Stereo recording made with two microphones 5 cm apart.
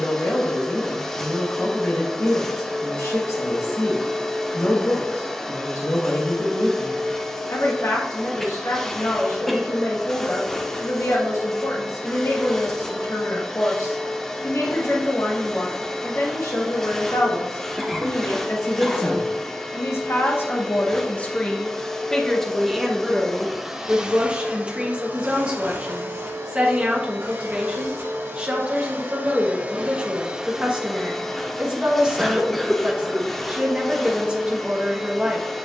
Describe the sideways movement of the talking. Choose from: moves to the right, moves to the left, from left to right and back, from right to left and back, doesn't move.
moves to the right.